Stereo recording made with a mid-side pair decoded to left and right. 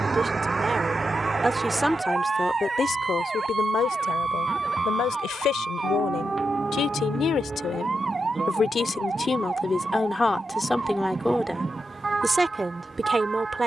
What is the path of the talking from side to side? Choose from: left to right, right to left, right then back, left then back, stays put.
left then back.